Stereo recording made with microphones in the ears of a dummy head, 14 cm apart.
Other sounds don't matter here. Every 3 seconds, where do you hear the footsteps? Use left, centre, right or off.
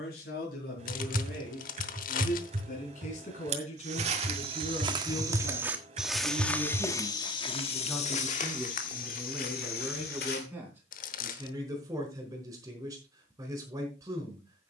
off, right, left, left, off.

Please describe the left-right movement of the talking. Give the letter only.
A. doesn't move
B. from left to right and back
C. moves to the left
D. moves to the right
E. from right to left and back
D.